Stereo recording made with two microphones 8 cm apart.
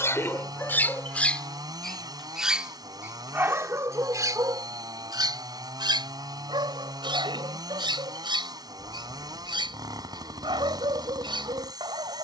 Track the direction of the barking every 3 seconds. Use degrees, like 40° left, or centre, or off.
20° left, 40° right, 70° right, 70° right.